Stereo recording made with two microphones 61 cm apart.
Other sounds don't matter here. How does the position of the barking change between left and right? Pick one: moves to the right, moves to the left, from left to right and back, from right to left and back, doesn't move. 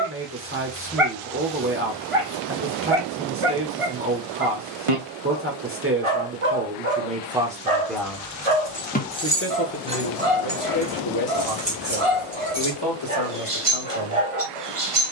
doesn't move.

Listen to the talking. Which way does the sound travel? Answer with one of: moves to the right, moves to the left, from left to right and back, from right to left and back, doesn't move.
moves to the left.